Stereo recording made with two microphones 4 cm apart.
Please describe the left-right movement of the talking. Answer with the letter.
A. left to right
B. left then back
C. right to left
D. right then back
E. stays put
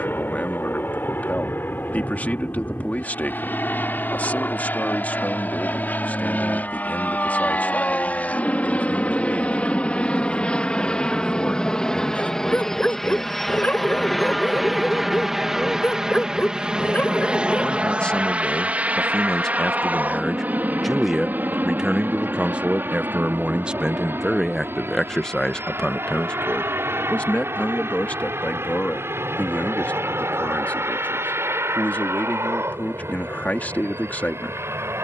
D.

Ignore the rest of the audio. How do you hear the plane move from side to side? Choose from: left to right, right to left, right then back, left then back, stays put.
left to right.